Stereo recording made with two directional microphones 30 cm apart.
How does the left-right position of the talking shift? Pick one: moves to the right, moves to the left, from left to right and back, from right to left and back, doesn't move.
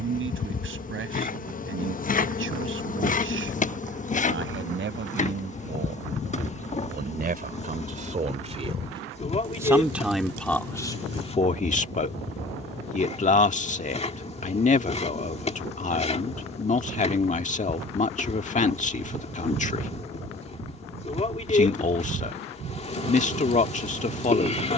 moves to the left.